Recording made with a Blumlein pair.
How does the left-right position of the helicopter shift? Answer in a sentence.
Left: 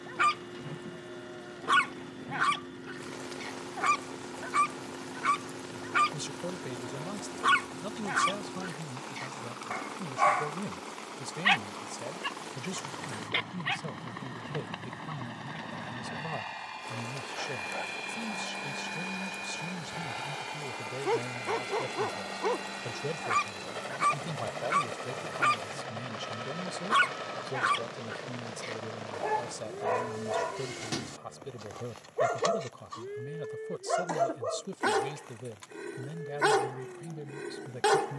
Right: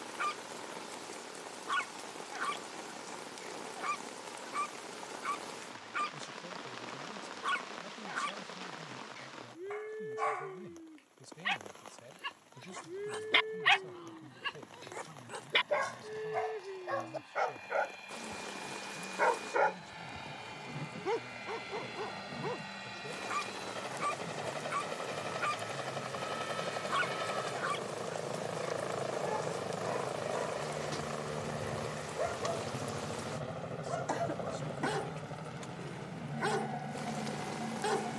In this clip you hear the helicopter travel towards the right.